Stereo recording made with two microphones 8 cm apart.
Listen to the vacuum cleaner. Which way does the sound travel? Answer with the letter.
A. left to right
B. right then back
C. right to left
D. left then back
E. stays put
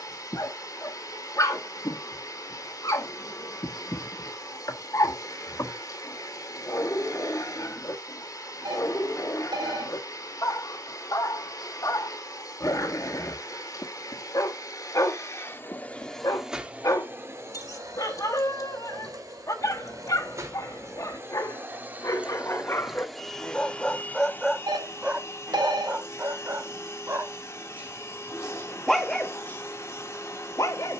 B.